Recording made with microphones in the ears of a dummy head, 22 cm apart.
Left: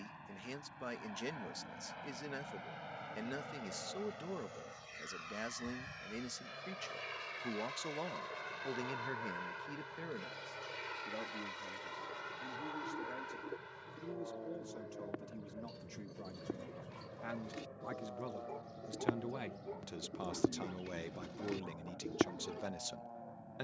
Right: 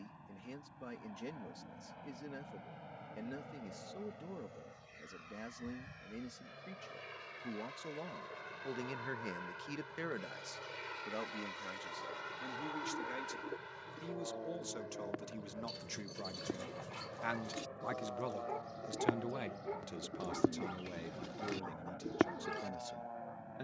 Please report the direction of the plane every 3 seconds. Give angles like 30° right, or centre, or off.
50° left, 40° left, 30° left, 10° left, 10° right, 30° right, 40° right, 50° right.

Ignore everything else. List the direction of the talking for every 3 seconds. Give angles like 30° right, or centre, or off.
50° left, 50° left, 40° left, 50° right, 70° right, 50° right, centre, 40° left.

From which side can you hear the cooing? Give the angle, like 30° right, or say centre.
10° right.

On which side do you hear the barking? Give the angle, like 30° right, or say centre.
60° right.